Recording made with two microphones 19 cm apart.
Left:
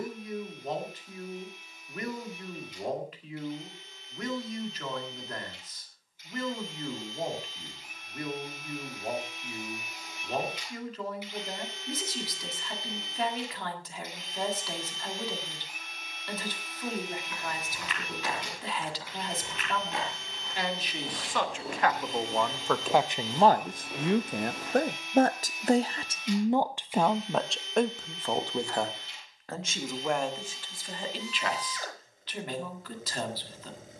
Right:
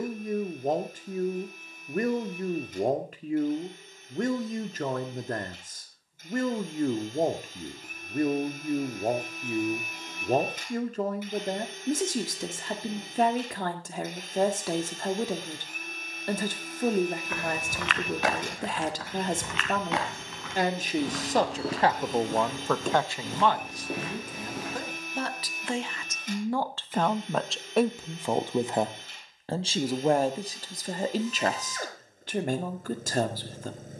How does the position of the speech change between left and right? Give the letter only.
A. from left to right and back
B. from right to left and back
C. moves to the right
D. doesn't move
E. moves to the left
B.